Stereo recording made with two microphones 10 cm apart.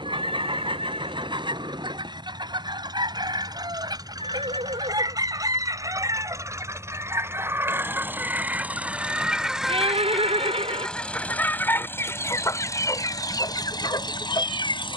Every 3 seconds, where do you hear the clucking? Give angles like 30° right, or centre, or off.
50° right, 40° right, 20° right, 10° left, 40° left.